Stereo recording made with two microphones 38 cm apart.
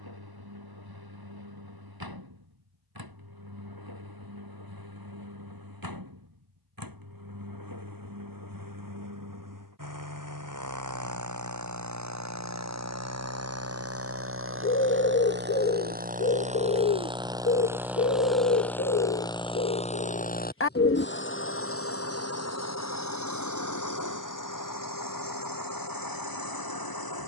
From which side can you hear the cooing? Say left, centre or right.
left.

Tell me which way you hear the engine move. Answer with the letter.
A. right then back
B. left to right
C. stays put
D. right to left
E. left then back
D.